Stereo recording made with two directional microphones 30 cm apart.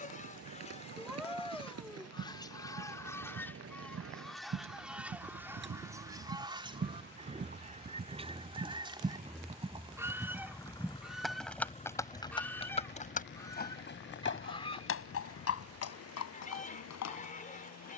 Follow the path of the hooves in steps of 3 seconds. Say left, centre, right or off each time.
right, right, right, centre, left, left.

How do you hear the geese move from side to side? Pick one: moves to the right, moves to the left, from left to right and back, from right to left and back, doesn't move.
from left to right and back.